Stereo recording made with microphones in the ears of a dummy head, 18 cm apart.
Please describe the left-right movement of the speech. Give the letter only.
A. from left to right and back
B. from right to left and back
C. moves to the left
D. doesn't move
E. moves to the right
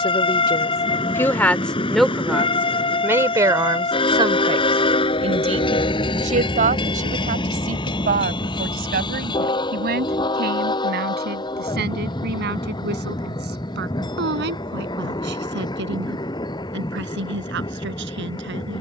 E.